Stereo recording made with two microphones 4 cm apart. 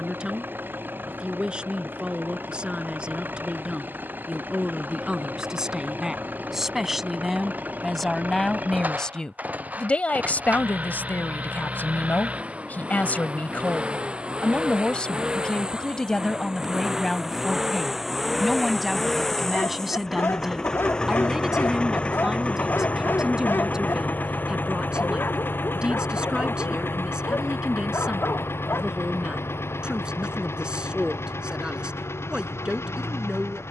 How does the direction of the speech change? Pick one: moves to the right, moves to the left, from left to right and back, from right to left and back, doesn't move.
from right to left and back.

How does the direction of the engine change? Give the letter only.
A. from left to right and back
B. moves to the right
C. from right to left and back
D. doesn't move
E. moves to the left
E.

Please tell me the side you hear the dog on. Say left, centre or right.
left.